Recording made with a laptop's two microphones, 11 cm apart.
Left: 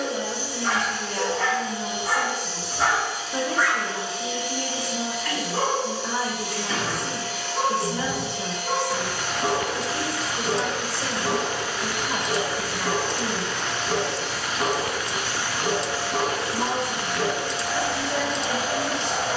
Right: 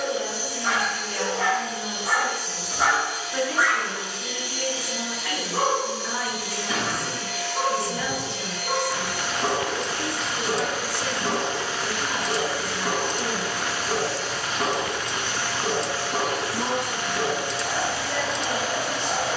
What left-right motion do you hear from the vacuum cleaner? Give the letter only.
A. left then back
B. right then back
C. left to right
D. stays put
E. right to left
B.